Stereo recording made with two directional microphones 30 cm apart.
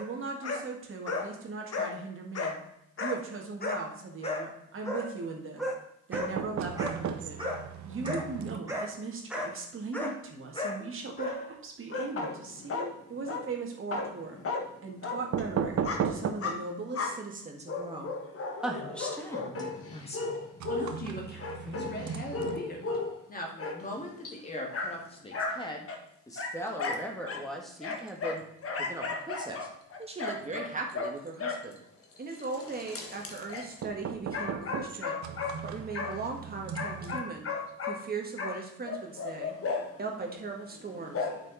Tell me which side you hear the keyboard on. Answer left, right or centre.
right.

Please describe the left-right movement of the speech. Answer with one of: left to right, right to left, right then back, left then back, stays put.
left then back.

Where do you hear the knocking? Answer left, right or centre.
right.